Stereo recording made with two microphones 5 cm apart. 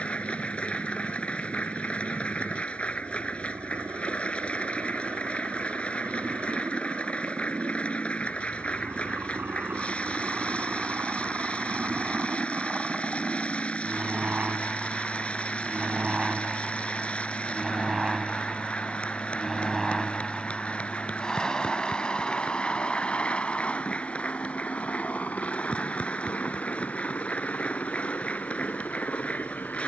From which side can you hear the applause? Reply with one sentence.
You can hear the applause on the left.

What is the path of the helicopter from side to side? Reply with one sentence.
You can hear the helicopter go from the right side to the left.